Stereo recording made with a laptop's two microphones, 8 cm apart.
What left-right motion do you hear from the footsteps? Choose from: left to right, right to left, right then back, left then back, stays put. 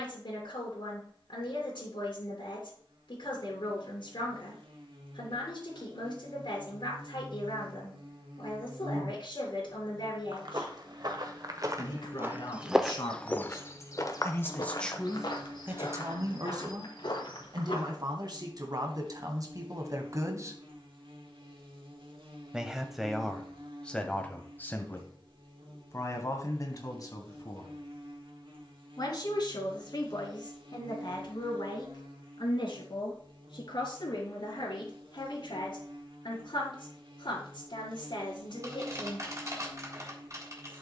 right to left.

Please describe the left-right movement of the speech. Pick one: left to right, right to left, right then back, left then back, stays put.
right then back.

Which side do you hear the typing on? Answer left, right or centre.
right.